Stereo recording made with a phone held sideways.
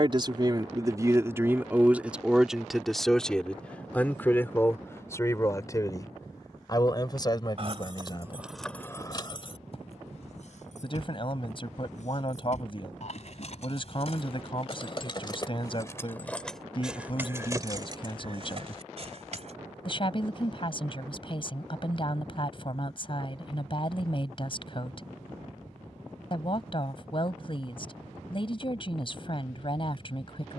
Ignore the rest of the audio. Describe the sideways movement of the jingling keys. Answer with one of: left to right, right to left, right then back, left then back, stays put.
left then back.